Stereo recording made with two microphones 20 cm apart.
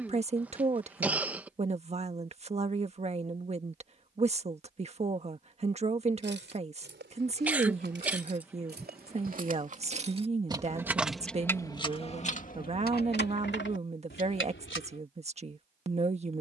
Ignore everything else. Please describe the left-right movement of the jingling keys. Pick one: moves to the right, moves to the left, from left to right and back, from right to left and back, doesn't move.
moves to the left.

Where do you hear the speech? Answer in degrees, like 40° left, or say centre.
30° right.